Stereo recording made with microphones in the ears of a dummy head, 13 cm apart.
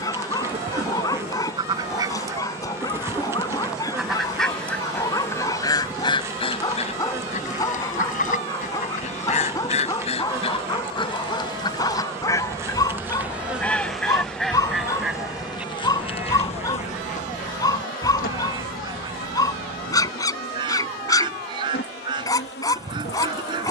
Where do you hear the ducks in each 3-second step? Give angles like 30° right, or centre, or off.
30° right, 10° left, 50° left, 40° left, 10° left, 10° right, 30° right, 30° right.